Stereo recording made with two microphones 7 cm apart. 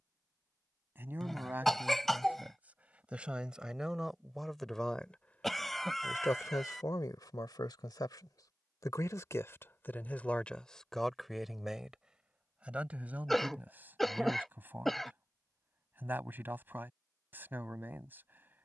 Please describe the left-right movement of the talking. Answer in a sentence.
In this clip you hear the talking go left and come back.